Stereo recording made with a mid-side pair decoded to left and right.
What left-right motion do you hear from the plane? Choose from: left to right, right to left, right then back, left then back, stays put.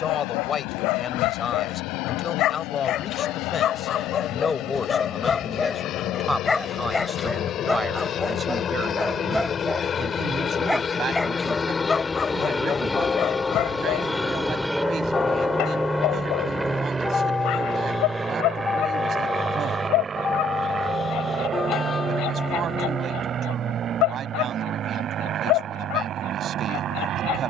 left to right.